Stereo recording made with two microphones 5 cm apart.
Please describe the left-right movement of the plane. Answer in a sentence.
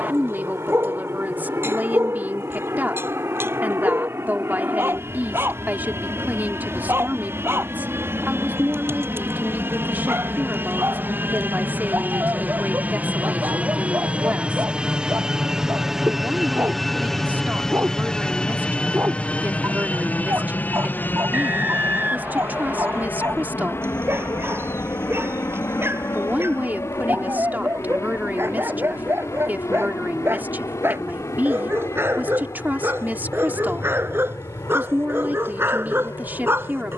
In this clip you hear the plane travel towards the left.